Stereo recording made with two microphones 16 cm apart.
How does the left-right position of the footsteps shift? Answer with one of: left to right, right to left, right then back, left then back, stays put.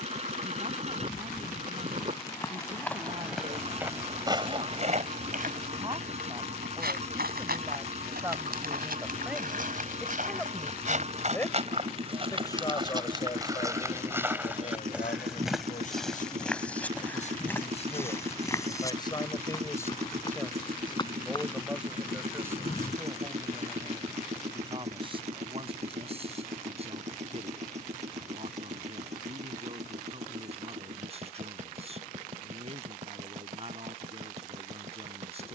right then back.